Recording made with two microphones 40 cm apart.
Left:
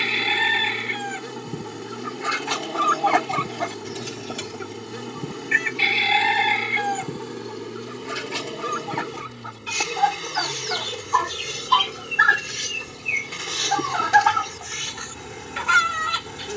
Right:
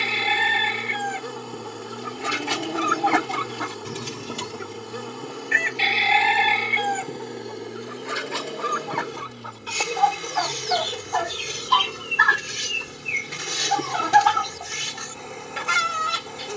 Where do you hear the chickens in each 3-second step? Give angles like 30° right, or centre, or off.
50° right, 10° right, 40° left, 20° left, 40° right, 60° right.